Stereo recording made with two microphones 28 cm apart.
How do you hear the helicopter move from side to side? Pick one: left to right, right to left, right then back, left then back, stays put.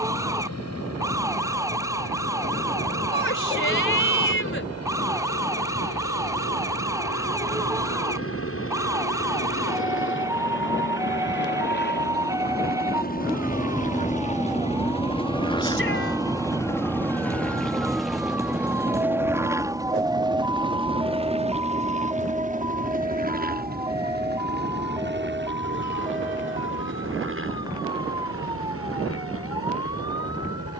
left to right.